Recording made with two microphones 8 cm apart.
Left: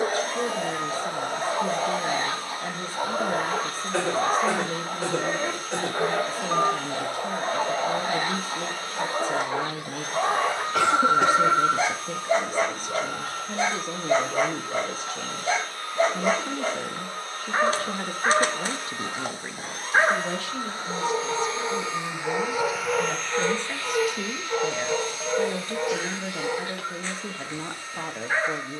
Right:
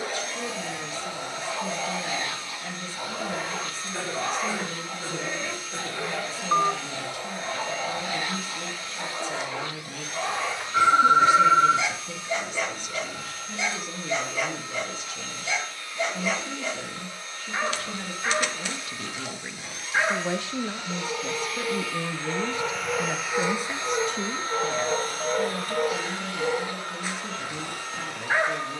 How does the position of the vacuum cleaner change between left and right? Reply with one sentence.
You can hear the vacuum cleaner move from left to right.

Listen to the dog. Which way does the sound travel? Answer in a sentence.
You can hear the dog travel towards the right.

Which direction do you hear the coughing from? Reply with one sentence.
You can hear the coughing on the left.